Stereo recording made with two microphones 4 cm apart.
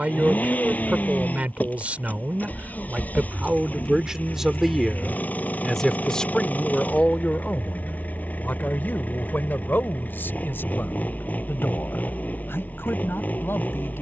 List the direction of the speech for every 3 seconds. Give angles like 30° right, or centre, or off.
30° right, 10° right, 30° left, 60° left, 70° left.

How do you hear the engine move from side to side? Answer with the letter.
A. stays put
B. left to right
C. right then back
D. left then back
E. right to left
A.